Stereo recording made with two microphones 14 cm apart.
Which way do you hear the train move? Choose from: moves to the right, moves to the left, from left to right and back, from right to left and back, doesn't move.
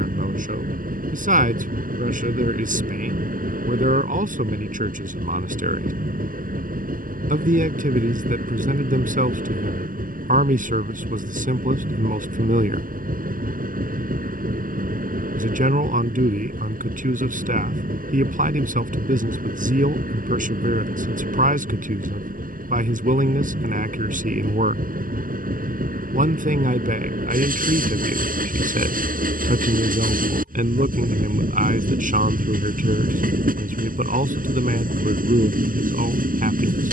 doesn't move.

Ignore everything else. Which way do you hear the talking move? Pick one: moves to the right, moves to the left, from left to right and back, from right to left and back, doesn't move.
doesn't move.